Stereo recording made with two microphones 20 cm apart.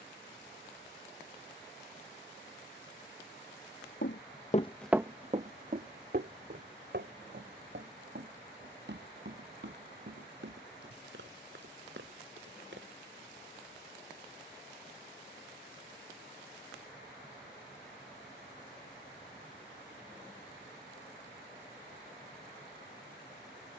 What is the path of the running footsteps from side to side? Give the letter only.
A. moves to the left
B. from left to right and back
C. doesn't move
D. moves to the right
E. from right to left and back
D.